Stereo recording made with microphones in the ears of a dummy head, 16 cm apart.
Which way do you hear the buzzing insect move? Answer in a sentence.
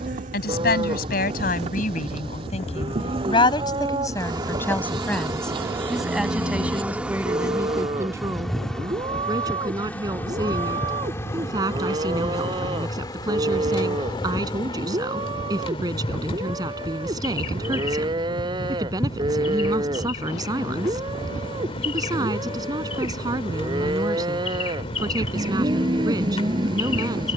In this clip you hear the buzzing insect go from the right side to the left.